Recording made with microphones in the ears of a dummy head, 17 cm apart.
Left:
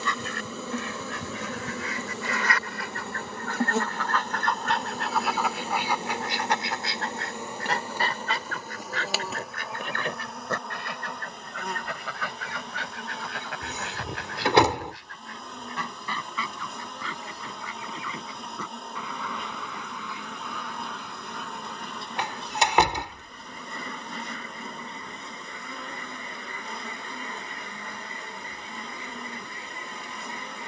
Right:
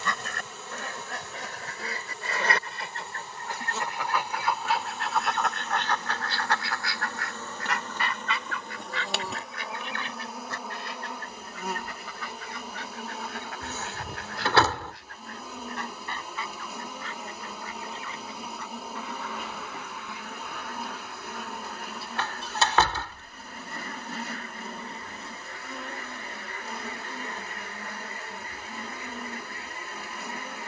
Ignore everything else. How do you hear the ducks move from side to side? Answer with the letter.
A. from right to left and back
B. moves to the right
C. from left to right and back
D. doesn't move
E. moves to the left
E.